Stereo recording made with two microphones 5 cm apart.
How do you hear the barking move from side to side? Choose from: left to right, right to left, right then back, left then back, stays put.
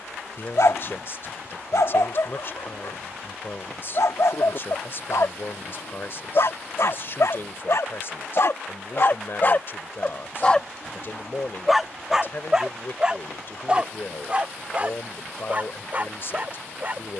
left to right.